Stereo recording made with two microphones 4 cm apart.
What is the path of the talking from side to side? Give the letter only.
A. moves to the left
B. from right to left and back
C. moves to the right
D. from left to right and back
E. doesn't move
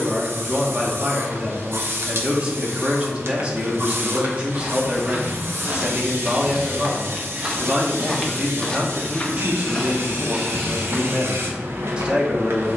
E.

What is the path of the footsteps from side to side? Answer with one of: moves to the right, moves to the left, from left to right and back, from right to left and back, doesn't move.
from right to left and back.